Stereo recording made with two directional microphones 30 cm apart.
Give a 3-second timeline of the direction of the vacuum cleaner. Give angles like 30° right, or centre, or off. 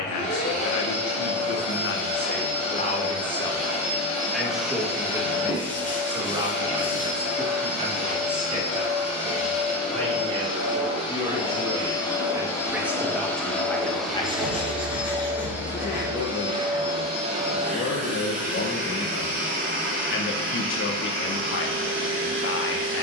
20° left, 20° left, 20° left, 20° left, centre, 10° right, 30° right, 40° right.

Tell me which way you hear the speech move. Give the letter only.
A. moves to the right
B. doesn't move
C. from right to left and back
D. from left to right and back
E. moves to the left
D.